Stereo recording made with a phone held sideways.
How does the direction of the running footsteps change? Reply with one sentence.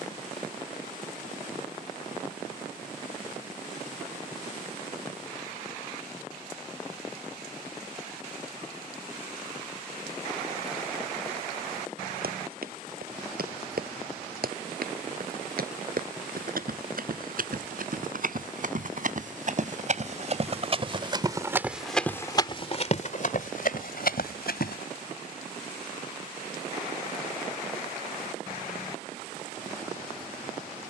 In this clip you hear the running footsteps go from the right side to the left.